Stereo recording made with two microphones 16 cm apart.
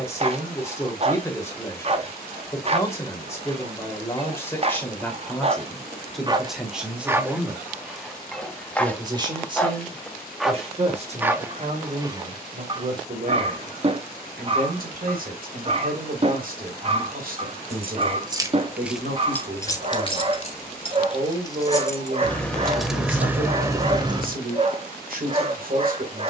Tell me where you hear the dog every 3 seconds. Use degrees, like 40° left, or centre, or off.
40° right, 40° right, 10° right, centre, 30° right, 40° right, 40° right, 40° right, 40° right.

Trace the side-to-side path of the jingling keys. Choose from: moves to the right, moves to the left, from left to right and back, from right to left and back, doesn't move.
from right to left and back.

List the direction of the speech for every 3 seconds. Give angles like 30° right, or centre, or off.
20° left, 10° left, 10° right, 40° right, 60° right, 60° right, 60° right, 60° right, 60° right.